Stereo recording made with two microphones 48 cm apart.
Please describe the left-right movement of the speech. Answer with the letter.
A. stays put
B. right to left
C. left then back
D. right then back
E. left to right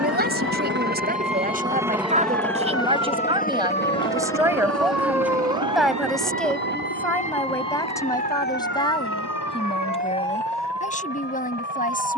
B.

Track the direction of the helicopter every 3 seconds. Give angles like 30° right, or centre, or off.
10° right, 30° left, 40° left, 50° left.